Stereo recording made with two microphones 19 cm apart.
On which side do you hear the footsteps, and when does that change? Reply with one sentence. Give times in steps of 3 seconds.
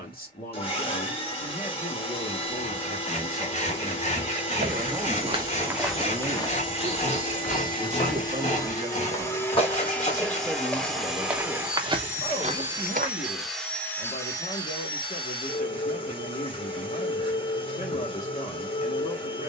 You can hear the footsteps not at all from 0 s, on the right from 3 s, on the left from 6 s, in the centre from 9 s, on the right from 12 s and not at all from 15 s.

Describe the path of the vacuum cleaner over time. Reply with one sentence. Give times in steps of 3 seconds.
In this clip you hear the vacuum cleaner on the left from 0 s, in the centre from 9 s and on the left from 15 s.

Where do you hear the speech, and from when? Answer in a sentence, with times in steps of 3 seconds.
You can hear the speech on the left from 0 s, in the centre from 3 s, on the right from 6 s, in the centre from 9 s and on the left from 12 s.